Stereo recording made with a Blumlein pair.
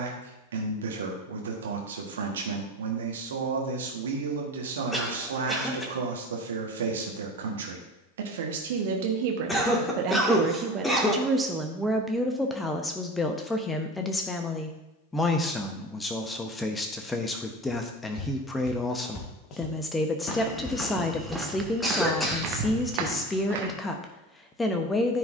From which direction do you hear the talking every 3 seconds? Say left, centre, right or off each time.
right, right, right, right, centre, centre, centre, centre, centre.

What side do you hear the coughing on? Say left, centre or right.
centre.